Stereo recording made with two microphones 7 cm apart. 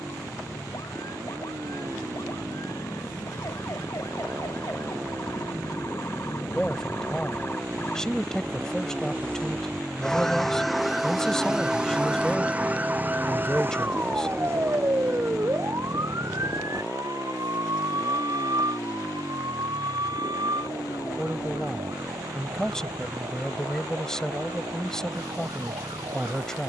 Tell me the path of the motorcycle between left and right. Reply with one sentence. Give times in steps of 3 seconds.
In this clip you hear the motorcycle on the right from 0 s, in the centre from 9 s and on the left from 15 s.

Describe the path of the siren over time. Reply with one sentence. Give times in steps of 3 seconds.
You can hear the siren on the left from 0 s, in the centre from 9 s and on the right from 12 s.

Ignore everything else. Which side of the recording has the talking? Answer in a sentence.
You can hear the talking in the centre.